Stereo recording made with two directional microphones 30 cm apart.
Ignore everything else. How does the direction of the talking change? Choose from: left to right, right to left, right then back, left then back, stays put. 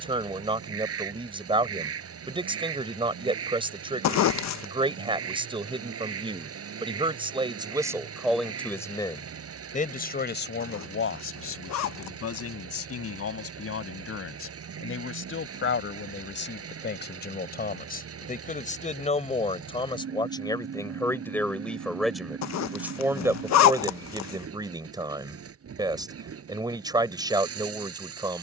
left then back.